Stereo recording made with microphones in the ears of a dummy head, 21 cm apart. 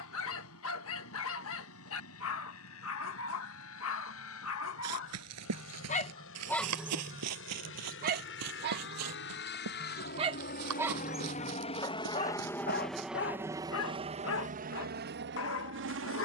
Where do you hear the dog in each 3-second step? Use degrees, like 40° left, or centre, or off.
60° left, 50° left, 20° right, 20° right, 50° left, 60° left.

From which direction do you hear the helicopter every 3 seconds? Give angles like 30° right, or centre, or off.
70° left, 60° left, 60° left, 40° left, 10° right, 50° right.